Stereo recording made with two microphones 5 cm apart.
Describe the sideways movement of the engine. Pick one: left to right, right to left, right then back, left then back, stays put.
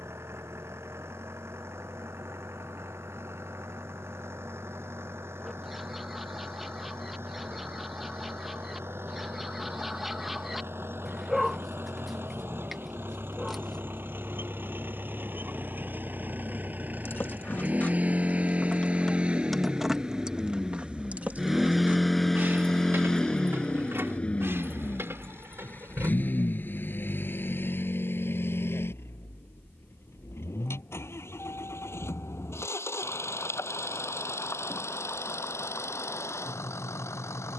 right to left.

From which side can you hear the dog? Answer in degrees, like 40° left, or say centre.
centre.